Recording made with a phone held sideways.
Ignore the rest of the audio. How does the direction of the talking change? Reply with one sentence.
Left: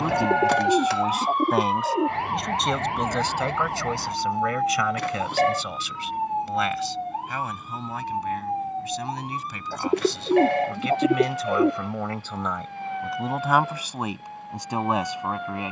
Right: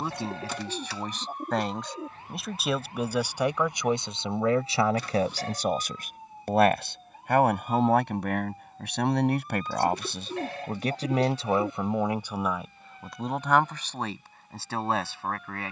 You can hear the talking move from left to right and back again.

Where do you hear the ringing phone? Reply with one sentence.
You can hear the ringing phone on the left.